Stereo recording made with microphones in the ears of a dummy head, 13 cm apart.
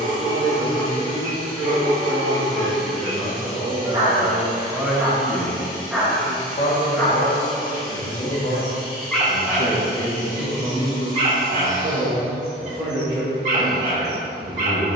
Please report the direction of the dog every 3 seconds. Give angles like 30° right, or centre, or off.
50° right, 20° right, 10° left, 20° right, 50° right.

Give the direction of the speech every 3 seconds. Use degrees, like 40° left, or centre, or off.
40° right, 10° right, 60° left, 20° left, 30° right.